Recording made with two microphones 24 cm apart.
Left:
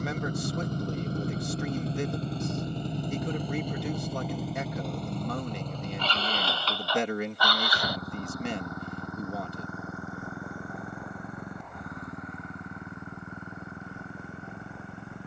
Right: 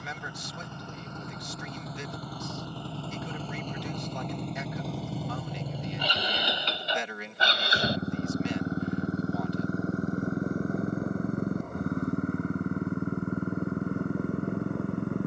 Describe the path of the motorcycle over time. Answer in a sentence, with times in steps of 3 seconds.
You can hear the motorcycle on the left from 0 s, in the centre from 3 s and on the right from 6 s.